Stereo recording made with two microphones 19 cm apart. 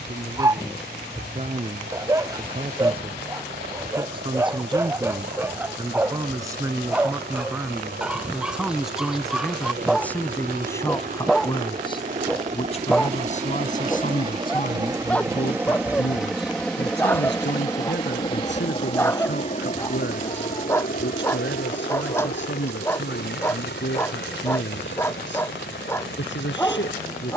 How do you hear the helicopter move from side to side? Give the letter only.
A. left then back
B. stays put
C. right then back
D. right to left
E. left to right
D.